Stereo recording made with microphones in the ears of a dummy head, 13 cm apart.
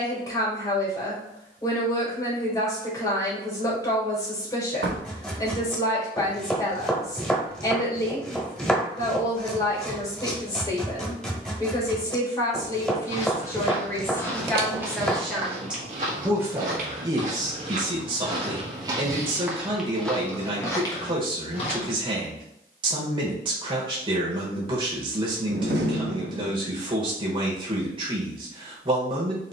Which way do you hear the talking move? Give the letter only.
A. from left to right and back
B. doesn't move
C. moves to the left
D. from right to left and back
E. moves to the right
E.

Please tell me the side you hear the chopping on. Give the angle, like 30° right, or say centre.
10° left.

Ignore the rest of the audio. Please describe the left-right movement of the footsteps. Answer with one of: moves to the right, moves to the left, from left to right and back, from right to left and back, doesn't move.
from left to right and back.